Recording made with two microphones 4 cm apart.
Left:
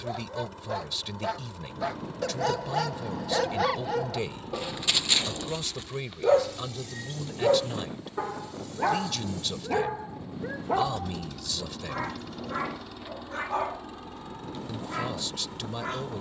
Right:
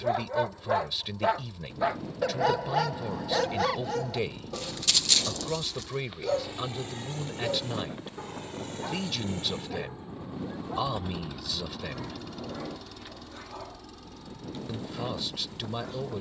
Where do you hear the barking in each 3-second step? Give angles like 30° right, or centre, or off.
20° right, 10° left, 50° left, 60° left, 70° left, 70° left.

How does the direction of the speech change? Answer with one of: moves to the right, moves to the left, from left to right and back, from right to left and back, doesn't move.
doesn't move.